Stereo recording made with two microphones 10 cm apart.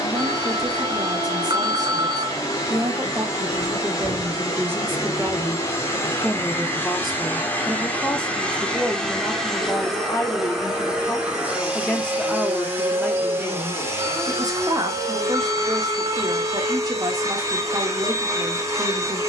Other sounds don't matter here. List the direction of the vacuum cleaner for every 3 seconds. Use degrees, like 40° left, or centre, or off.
30° left, 30° left, 20° left, centre, 20° right, 30° right, 30° right.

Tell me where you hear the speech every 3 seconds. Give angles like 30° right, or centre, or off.
40° right, 20° right, centre, 20° left, 20° right, 40° right, 40° right.